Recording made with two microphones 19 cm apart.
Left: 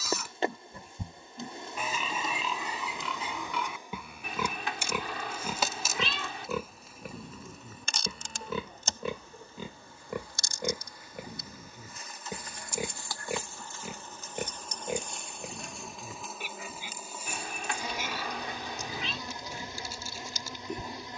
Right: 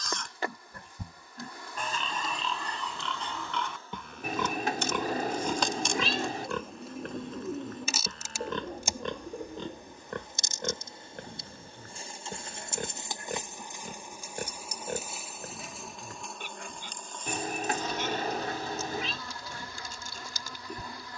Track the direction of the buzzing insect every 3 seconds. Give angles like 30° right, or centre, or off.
20° left, 10° left, 10° right, 20° right, 20° right, centre, 20° left.